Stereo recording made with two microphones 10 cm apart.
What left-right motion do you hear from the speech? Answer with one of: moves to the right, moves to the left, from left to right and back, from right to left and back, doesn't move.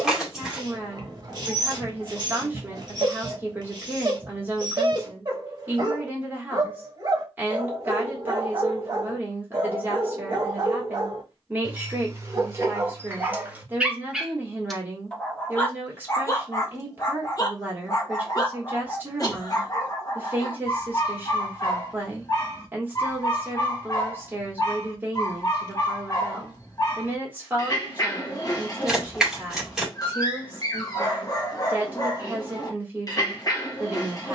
doesn't move.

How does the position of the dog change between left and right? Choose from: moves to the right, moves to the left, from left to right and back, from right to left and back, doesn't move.
moves to the left.